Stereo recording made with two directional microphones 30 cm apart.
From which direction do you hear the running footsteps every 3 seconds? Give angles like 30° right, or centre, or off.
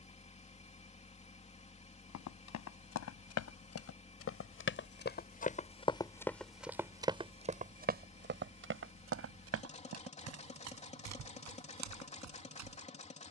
60° left, 40° left, 20° right, 60° right, 70° right.